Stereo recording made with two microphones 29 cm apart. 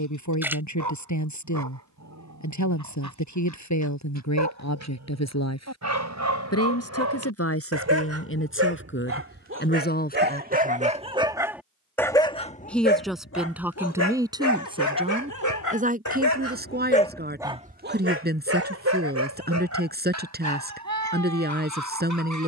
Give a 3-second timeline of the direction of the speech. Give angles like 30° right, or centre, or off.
60° left, 60° left, 50° left, 30° left, 10° right, 30° right, 30° right, 30° right.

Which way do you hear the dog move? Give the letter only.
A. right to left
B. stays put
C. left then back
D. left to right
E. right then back
C.